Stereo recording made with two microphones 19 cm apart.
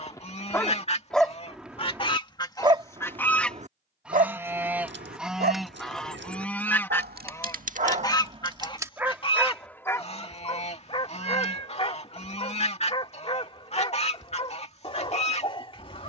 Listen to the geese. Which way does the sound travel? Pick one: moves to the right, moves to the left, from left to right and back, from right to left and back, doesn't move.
from left to right and back.